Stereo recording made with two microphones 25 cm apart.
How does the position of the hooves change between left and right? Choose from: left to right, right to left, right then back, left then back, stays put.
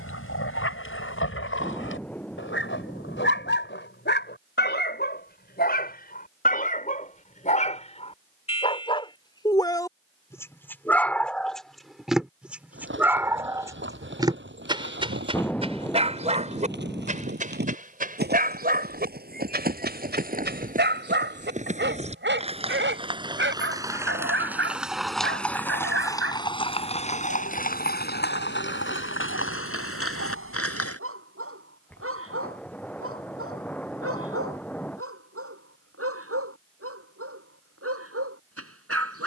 right to left.